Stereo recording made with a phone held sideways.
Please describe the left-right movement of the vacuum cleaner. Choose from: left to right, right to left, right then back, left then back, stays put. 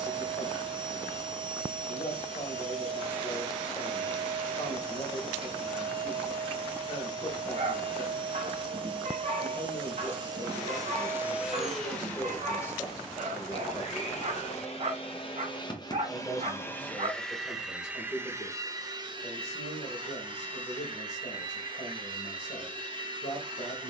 left then back.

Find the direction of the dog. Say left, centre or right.
right.